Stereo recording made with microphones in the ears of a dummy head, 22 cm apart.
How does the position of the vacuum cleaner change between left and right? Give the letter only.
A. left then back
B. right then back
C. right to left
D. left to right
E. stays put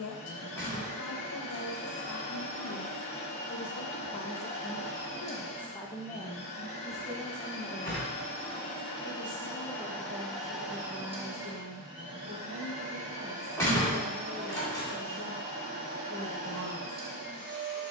D.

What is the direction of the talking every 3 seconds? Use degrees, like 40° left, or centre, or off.
60° left, 40° left, centre, 20° right, 30° right, 30° right.